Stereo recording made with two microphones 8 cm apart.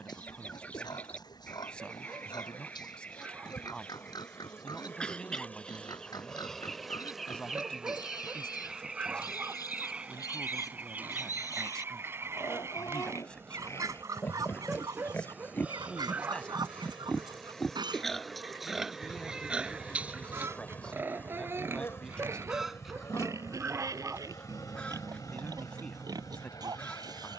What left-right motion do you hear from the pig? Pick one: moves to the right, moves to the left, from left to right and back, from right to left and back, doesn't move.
moves to the right.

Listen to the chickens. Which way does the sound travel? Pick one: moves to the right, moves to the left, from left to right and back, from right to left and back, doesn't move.
from left to right and back.